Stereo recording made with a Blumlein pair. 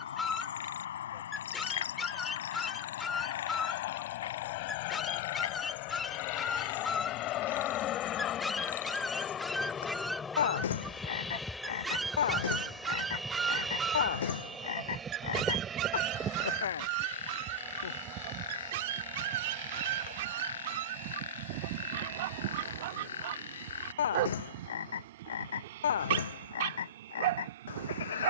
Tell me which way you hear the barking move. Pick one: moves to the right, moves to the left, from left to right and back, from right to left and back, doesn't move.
moves to the right.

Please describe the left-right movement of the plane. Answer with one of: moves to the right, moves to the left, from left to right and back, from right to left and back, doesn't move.
moves to the right.